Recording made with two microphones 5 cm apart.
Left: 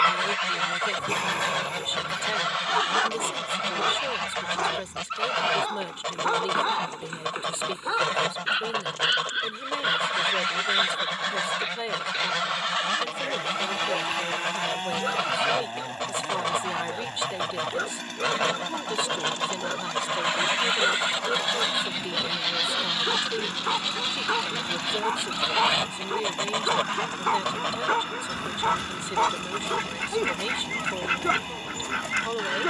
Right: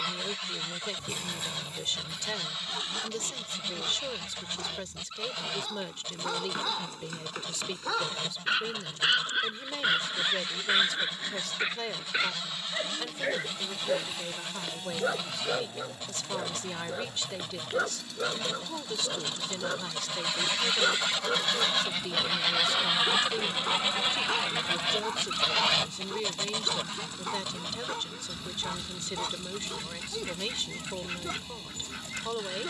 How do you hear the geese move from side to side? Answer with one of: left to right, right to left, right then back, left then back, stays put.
right then back.